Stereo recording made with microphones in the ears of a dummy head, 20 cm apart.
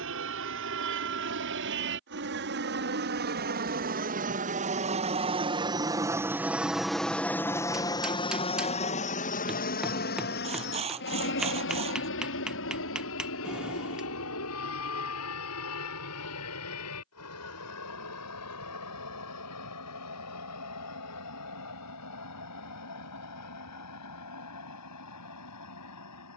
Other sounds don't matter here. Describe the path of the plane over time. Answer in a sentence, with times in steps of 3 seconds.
In this clip you hear the plane on the right from 0 s, in the centre from 6 s and on the left from 9 s.